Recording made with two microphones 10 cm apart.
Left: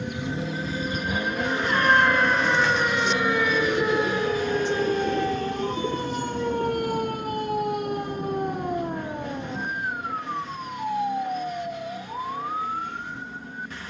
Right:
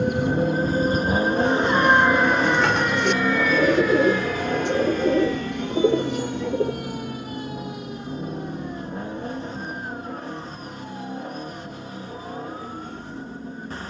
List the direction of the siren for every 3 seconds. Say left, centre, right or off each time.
right, left, left, left, left.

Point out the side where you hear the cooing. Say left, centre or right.
right.